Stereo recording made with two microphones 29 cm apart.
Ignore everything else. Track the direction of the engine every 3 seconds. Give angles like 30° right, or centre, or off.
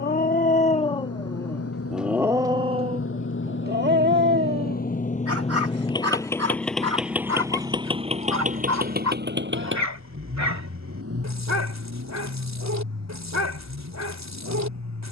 60° left, 30° left, 10° right, 50° right, 60° right.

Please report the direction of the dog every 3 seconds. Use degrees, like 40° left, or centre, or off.
10° left, 40° right, 70° right, 70° right, 70° right.